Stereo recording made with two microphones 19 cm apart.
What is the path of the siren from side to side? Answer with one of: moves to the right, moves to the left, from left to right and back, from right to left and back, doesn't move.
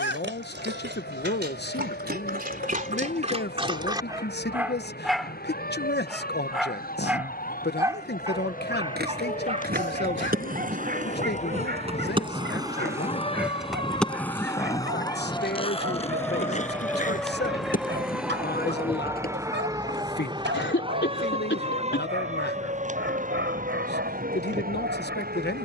moves to the right.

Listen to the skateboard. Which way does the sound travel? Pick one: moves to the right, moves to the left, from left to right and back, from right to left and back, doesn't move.
moves to the left.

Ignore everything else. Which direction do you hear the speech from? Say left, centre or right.
left.